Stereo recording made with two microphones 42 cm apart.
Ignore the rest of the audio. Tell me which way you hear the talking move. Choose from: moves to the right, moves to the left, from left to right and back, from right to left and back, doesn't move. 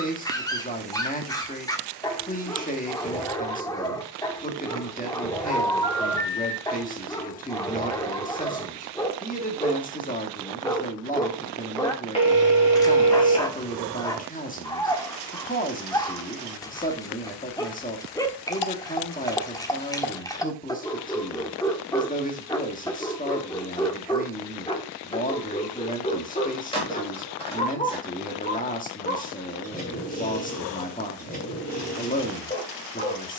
doesn't move.